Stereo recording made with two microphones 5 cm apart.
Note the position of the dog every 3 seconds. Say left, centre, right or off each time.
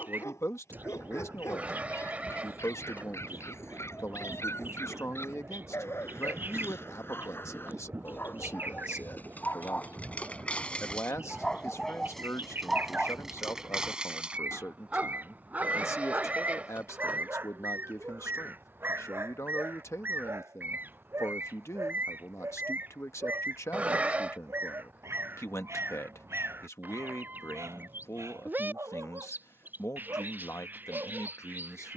left, left, left, left, centre, right, right, right, right, right, right.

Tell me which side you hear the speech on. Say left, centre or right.
left.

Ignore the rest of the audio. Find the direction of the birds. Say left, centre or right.
right.